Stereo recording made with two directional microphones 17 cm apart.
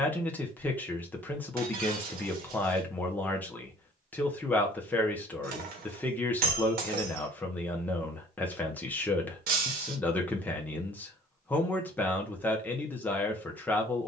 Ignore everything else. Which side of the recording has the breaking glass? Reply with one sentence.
You can hear the breaking glass on the right.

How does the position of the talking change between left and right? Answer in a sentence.
In this clip you hear the talking stay put.